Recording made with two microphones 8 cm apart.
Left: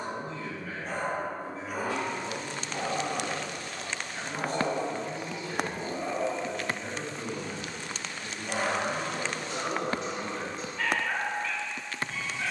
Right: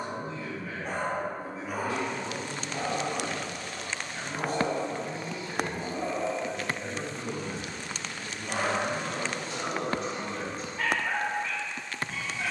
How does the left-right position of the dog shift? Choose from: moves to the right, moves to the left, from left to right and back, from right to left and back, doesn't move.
from right to left and back.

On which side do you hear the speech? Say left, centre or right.
centre.